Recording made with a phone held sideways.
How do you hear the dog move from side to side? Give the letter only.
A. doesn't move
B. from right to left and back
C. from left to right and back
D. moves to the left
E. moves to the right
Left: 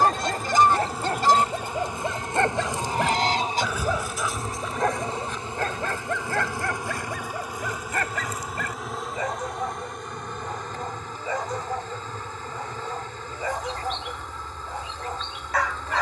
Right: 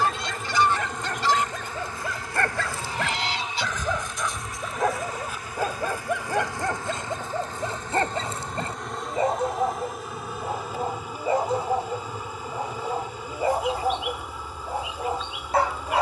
E.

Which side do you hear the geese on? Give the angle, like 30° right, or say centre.
40° left.